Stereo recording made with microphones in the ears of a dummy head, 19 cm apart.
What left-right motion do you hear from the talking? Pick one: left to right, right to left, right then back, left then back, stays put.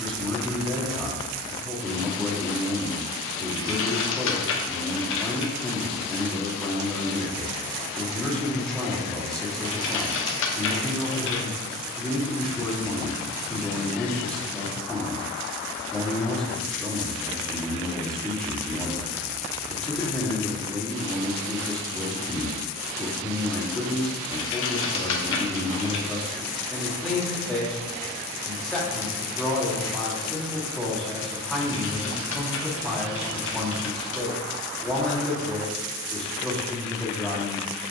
stays put.